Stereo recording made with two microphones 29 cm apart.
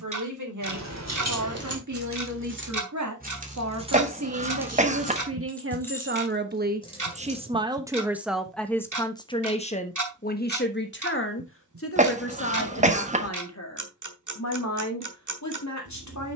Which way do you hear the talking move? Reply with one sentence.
You can hear the talking go from the right side to the left.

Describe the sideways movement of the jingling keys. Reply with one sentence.
You can hear the jingling keys move from right to left.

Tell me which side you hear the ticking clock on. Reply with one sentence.
You can hear the ticking clock on the right.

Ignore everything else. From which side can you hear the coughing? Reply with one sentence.
In this clip you hear the coughing on the right.